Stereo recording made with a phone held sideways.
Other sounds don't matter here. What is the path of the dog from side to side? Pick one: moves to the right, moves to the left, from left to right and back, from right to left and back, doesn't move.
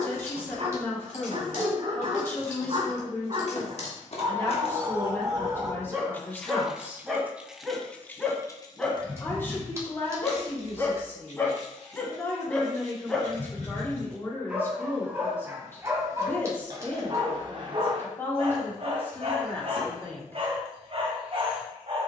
from right to left and back.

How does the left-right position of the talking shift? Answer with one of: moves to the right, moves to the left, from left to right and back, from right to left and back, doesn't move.
doesn't move.